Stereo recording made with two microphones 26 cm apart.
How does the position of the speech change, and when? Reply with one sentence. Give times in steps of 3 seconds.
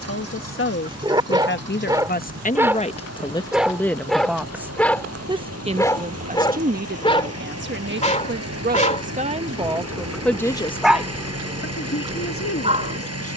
You can hear the speech on the left from 0 s, in the centre from 3 s, on the right from 6 s, in the centre from 9 s and on the left from 12 s.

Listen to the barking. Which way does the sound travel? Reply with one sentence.
You can hear the barking go left and come back.